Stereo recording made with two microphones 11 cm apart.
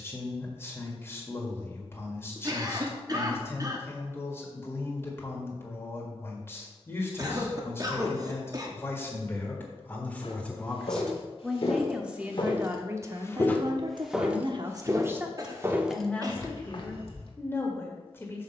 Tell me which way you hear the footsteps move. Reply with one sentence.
In this clip you hear the footsteps go right and come back.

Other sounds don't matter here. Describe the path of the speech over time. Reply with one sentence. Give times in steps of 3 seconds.
You can hear the speech on the left from 0 s, in the centre from 9 s, on the right from 12 s and in the centre from 15 s.